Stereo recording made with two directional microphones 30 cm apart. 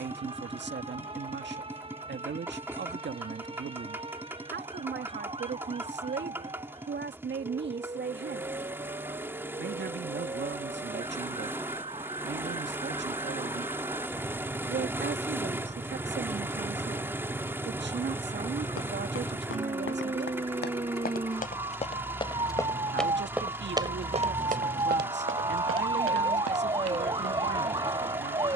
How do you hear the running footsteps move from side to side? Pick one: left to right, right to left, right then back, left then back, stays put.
left to right.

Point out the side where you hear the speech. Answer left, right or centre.
right.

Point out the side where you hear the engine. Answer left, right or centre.
centre.